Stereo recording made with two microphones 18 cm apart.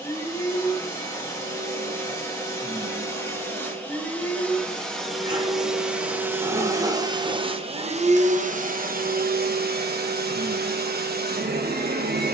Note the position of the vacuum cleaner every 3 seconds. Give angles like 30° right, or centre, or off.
20° left, 10° left, 30° right, 70° right.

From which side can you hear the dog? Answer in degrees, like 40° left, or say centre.
30° right.